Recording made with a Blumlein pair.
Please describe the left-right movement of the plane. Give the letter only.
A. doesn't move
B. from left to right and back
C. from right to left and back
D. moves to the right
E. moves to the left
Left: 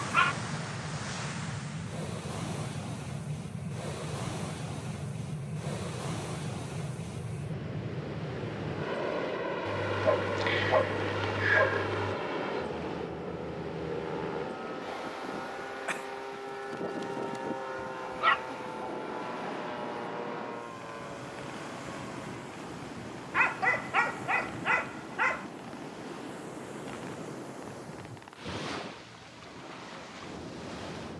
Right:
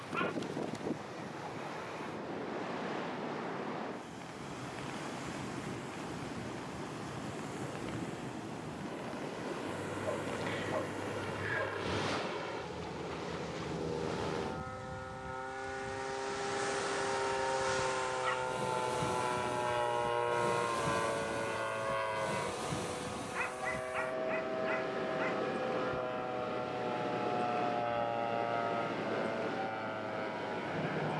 D.